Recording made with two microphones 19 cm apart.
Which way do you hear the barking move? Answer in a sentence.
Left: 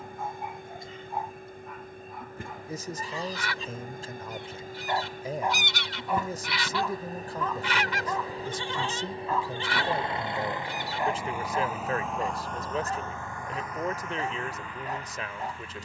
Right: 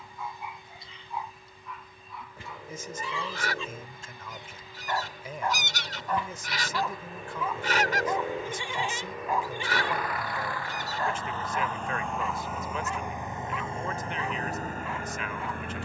You can hear the barking go right and come back.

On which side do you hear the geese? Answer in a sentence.
You can hear the geese on the right.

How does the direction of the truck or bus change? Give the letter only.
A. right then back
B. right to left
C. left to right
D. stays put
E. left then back
C.